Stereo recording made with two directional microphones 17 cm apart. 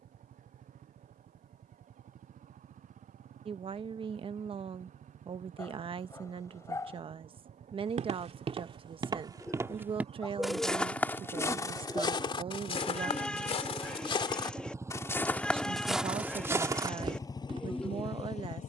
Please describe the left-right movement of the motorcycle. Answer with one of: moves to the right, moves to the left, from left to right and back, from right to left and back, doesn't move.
moves to the left.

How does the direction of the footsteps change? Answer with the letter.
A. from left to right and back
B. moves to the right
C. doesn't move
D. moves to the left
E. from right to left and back
E.